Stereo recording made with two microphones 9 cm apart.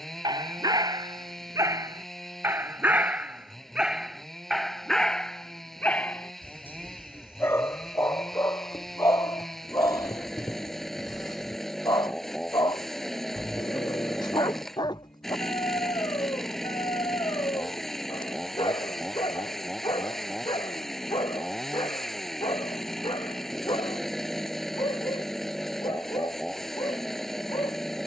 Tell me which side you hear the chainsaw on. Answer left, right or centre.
centre.